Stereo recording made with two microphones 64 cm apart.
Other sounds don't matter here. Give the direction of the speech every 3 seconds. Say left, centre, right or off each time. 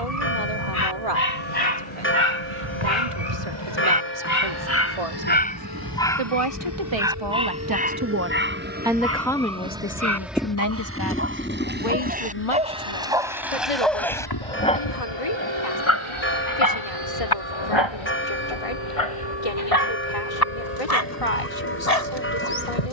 right, right, right, left, left, left, left, left.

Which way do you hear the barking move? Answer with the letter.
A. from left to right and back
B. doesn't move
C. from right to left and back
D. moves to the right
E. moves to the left
A.